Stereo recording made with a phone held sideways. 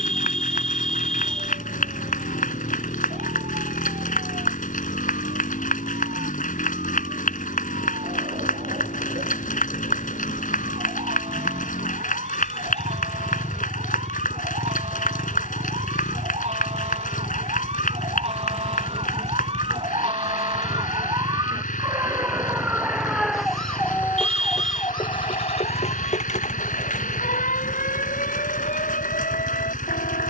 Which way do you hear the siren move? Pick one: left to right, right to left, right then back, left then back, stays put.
right to left.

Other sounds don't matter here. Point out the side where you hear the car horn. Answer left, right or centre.
centre.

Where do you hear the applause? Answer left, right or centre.
left.